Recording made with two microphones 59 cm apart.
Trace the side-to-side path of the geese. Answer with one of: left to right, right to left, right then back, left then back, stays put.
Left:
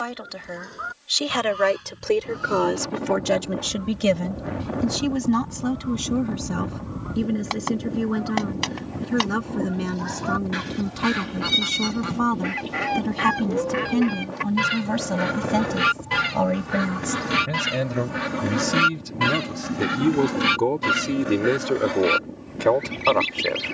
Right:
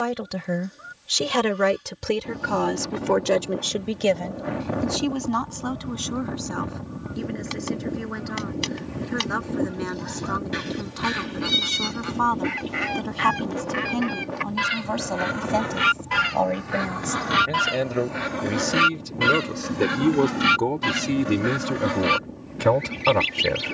left to right.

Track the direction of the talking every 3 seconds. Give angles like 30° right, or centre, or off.
50° right, 40° left, 60° left, 50° left, 50° left, 40° left, 10° left, 30° right.